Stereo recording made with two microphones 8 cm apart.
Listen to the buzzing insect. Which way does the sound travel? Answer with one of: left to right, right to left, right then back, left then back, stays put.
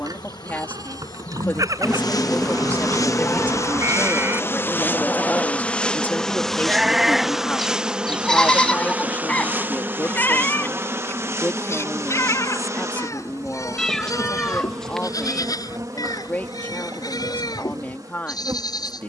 left to right.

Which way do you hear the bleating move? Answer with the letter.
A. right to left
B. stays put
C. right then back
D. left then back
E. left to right
A.